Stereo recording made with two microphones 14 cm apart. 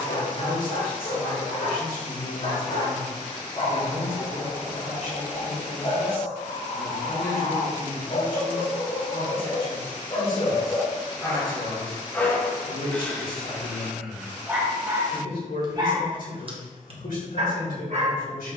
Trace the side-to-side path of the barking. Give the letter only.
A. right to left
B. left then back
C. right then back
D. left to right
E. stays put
D.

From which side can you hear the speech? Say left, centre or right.
left.